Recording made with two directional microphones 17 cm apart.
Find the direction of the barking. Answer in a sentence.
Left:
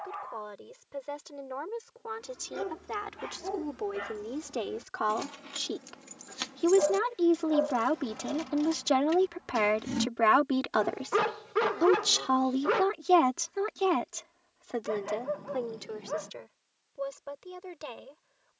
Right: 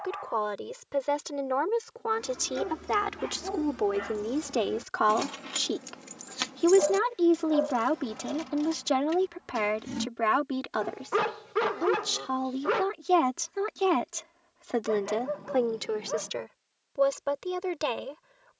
You can hear the barking in the centre.